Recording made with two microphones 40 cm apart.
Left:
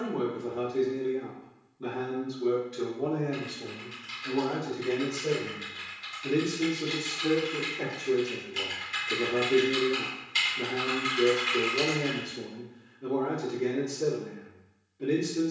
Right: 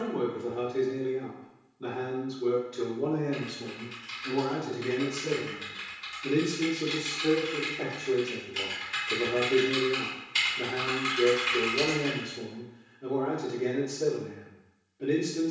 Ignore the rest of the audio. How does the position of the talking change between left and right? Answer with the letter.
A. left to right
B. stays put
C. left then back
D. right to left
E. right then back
E.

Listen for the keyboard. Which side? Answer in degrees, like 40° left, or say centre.
20° right.